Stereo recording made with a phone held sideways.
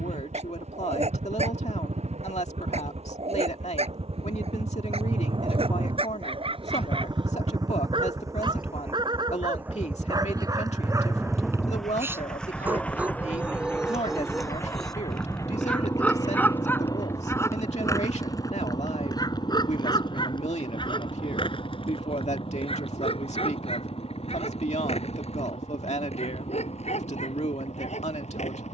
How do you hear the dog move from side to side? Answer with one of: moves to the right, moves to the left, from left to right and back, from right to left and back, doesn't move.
moves to the left.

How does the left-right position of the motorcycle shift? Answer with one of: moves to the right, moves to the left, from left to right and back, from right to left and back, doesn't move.
moves to the left.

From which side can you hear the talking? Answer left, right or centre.
left.